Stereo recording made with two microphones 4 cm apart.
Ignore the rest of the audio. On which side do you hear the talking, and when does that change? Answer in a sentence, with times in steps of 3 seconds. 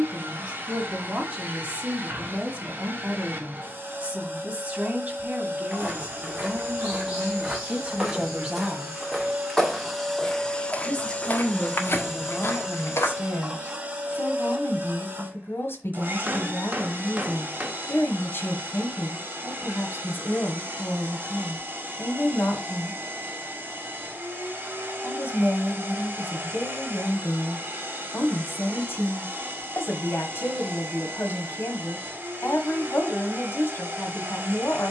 You can hear the talking on the right from 0 s and on the left from 9 s.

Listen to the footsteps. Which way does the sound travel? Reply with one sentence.
You can hear the footsteps move to the left.